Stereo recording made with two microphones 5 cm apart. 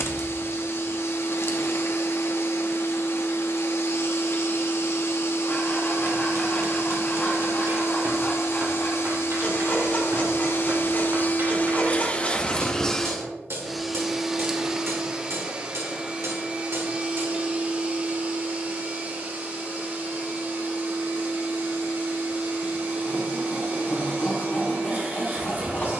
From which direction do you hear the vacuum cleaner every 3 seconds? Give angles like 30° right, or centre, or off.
60° left, 60° left, 60° left, 50° left, centre, 30° right, 40° right, 40° right, 40° right.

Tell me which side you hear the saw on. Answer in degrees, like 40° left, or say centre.
30° left.